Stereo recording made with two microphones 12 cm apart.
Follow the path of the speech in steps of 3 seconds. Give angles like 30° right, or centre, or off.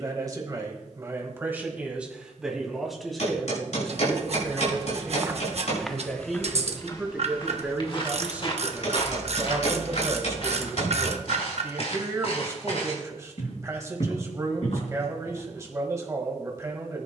20° right, 10° left, 10° right, 20° right, 30° right, 30° right.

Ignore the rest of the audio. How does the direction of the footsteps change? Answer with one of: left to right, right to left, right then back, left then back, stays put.
right to left.